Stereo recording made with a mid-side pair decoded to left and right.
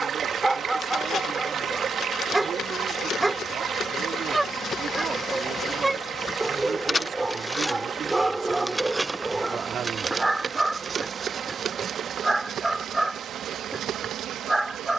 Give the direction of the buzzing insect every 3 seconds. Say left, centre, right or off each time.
left, left, centre, right, right.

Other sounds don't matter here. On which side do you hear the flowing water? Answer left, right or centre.
right.